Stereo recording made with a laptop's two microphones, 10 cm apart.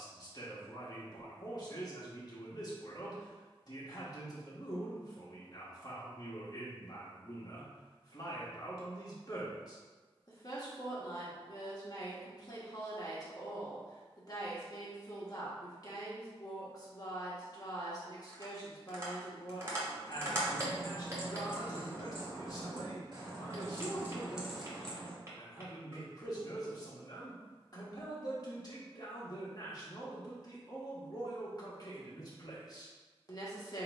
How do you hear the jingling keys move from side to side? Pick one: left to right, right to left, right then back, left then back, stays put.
right then back.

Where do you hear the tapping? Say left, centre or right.
right.